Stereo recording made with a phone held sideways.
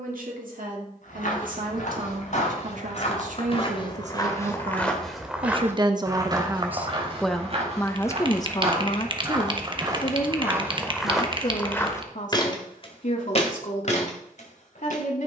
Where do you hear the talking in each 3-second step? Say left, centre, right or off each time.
right, right, centre, left, left.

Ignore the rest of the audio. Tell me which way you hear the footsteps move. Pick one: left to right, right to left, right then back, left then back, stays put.
right then back.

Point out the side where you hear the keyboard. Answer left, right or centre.
right.